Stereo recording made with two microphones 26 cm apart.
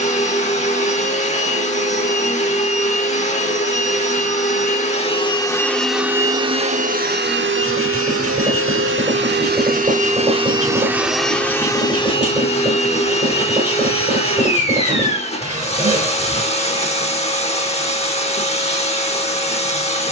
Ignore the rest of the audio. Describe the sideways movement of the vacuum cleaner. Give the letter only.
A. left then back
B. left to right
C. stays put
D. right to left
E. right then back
E.